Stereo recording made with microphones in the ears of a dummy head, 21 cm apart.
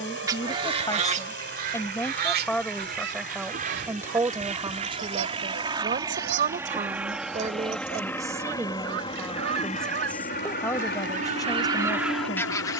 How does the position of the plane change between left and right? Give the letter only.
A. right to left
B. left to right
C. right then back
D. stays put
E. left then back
A.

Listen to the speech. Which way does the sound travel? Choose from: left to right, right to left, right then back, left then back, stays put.
right then back.